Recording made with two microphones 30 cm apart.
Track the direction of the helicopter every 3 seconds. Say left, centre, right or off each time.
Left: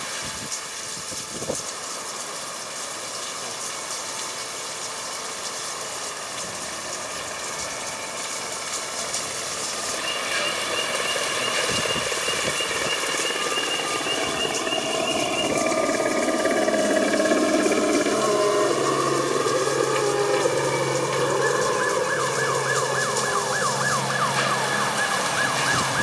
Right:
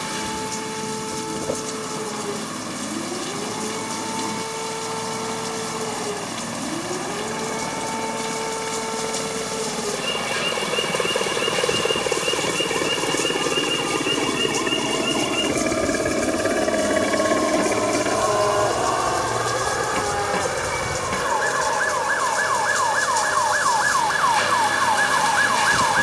right, right, right, right, right, centre, left, left, left.